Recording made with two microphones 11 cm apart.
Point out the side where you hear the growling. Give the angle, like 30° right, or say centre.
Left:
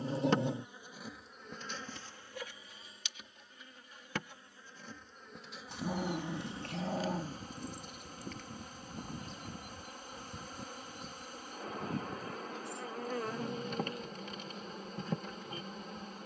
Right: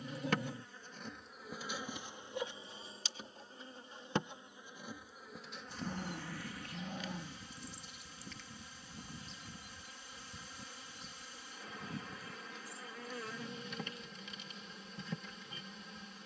60° left.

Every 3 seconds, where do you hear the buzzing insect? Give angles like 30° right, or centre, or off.
centre, 20° right, 40° left, 50° left, 50° left, 50° left.